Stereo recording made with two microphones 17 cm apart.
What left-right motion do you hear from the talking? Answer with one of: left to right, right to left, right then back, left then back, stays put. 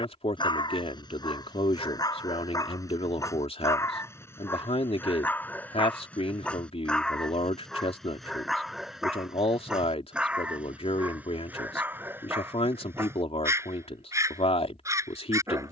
stays put.